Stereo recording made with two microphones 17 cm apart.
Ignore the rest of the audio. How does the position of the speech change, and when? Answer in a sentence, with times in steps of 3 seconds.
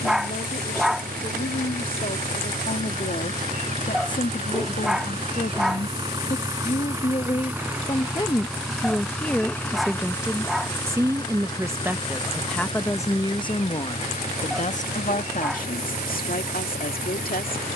You can hear the speech on the left from 0 s, in the centre from 9 s and on the left from 12 s.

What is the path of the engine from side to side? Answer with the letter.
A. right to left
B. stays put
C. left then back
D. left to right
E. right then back
A.